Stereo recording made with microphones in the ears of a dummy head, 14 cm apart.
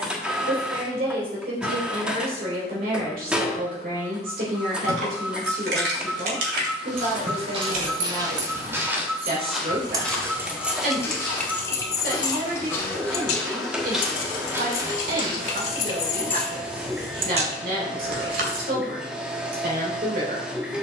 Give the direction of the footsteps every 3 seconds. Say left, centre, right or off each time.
off, off, right, centre, centre, right, off.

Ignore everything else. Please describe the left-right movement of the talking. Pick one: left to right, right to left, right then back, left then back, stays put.
stays put.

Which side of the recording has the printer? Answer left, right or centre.
centre.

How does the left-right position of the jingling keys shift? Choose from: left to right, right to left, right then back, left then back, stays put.
left then back.